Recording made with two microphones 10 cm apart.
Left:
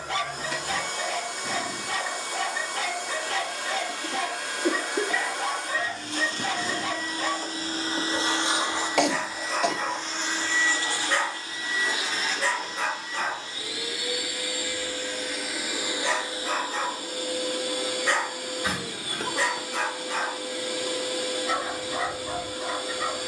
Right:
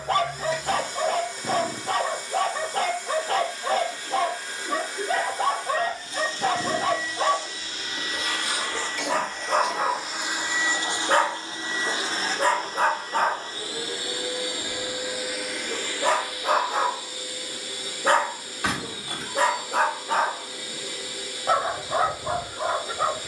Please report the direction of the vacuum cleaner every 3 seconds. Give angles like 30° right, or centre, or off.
70° left, 70° left, 40° left, 10° right, 30° right, 30° left, 60° left, 60° left.